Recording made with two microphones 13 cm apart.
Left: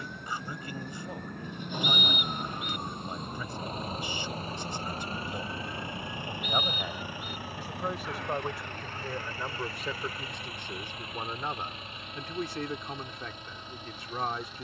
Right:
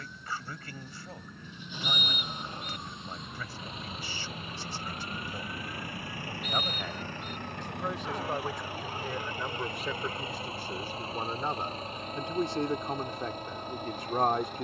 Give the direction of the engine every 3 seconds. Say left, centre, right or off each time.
left, left, centre, right, right.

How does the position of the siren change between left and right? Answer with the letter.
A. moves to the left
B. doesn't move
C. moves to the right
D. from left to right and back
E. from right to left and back
C.